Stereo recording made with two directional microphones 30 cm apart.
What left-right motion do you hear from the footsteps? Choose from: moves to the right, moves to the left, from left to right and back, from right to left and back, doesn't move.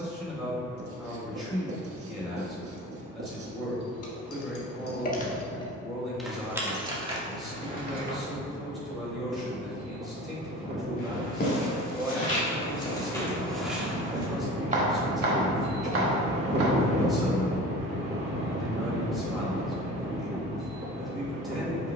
moves to the right.